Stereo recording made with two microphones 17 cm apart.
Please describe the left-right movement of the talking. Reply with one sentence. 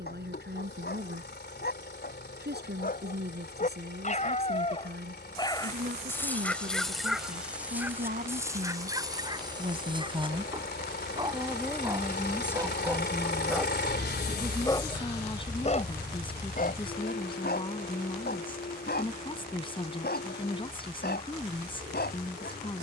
You can hear the talking move from right to left.